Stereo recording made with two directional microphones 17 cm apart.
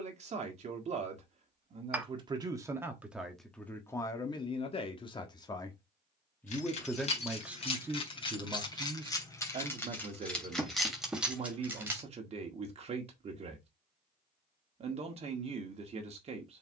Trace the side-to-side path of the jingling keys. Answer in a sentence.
In this clip you hear the jingling keys move to the right.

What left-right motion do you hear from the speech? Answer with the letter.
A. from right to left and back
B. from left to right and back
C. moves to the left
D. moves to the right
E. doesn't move
A.